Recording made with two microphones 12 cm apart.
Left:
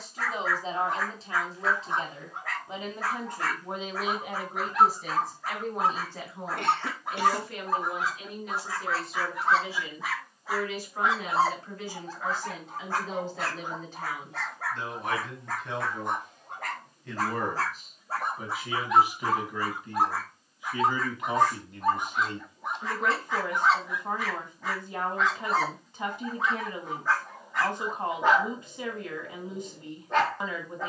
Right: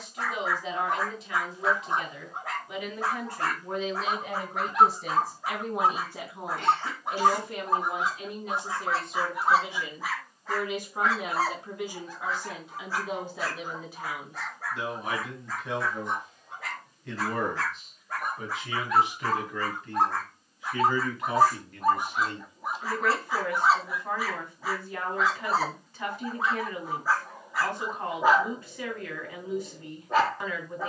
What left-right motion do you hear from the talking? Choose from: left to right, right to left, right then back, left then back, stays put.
right then back.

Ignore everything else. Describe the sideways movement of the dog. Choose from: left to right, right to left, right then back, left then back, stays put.
left then back.